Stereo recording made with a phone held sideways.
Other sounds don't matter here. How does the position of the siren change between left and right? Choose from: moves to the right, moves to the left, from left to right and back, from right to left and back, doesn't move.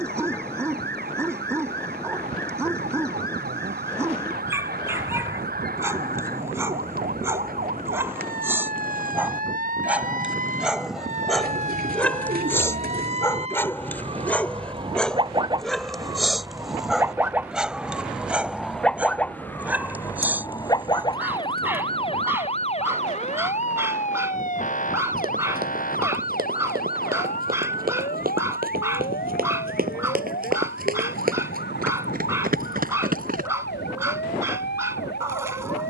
moves to the left.